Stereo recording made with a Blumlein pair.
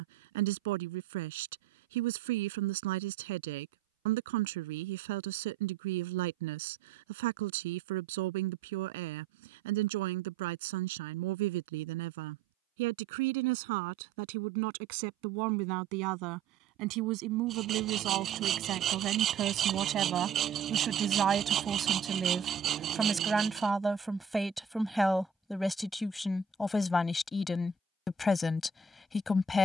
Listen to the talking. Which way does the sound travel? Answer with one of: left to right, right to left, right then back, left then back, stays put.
right to left.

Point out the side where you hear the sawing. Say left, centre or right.
right.